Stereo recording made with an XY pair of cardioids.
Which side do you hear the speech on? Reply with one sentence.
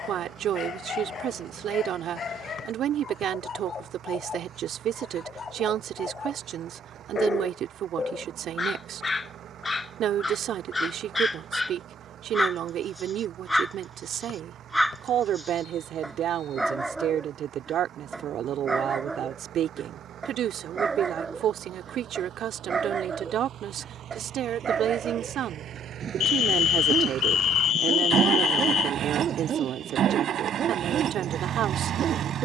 You can hear the speech on the right.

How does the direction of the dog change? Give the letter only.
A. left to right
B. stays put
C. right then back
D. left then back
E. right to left
A.